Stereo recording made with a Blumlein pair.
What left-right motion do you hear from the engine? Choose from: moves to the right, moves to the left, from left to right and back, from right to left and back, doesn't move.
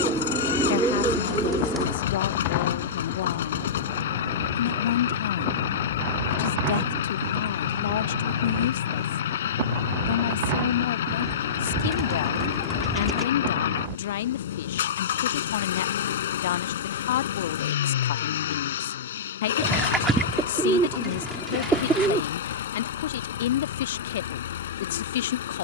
doesn't move.